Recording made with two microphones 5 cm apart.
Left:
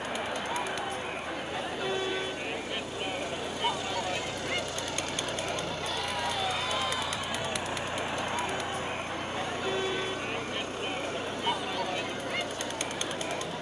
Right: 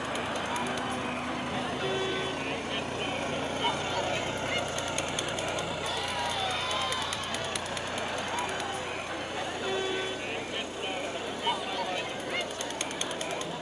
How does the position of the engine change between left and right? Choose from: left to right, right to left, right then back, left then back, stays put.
right to left.